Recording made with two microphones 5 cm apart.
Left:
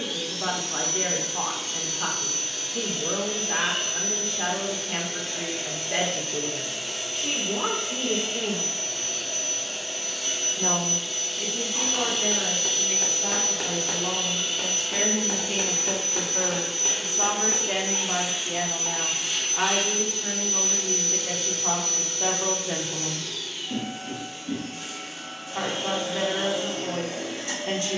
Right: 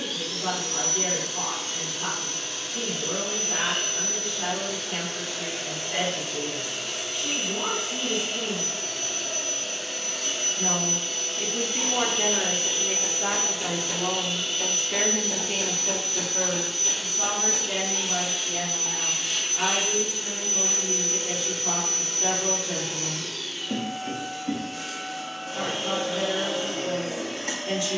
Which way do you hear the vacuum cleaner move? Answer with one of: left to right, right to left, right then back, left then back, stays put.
left then back.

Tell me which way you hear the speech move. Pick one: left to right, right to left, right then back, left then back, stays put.
right then back.